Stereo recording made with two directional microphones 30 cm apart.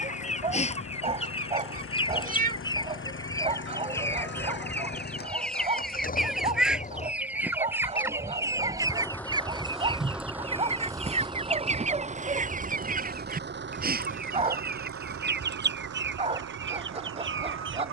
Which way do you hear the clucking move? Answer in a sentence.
You can hear the clucking move from left to right.